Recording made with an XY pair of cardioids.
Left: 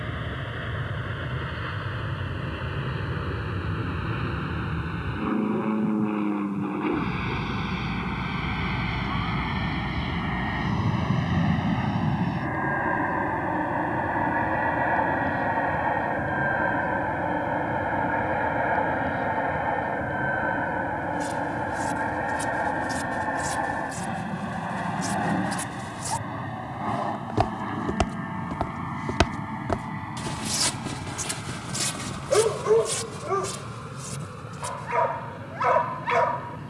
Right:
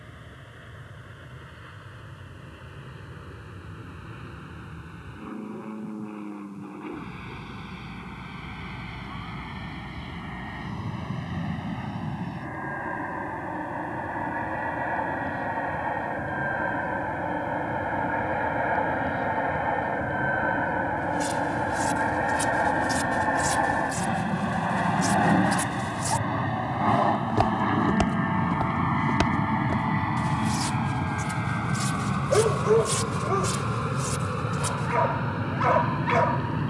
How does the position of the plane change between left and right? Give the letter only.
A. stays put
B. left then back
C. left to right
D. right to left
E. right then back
C.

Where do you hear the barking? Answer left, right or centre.
centre.